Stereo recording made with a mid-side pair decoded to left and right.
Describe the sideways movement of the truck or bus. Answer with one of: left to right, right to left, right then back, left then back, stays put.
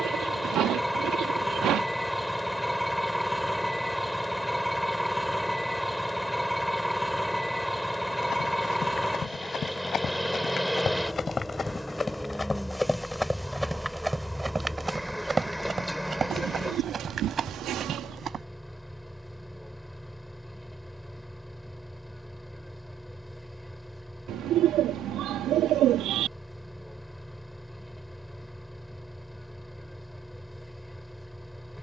stays put.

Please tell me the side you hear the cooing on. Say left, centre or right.
right.